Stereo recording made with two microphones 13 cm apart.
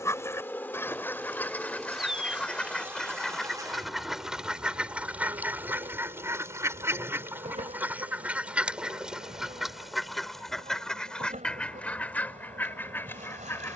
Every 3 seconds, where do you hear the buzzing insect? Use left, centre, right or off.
centre, right, right, right, right.